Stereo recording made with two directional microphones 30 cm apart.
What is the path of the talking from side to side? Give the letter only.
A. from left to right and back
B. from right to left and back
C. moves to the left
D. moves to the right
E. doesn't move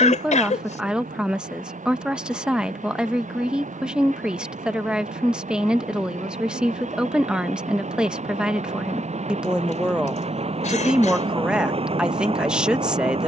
E.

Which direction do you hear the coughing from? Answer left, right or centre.
left.